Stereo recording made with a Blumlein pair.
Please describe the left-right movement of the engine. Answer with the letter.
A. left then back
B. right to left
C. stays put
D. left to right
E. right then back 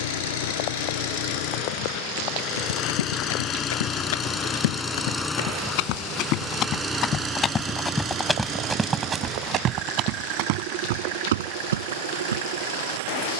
D.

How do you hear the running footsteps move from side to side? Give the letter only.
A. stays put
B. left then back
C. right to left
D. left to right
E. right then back
D.